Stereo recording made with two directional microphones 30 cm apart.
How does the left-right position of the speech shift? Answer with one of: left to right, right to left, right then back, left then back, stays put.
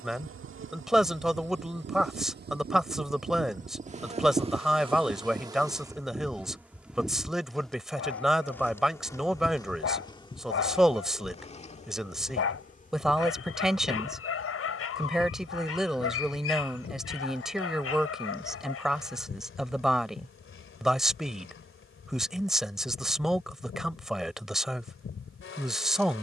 stays put.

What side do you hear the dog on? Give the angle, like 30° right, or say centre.
50° left.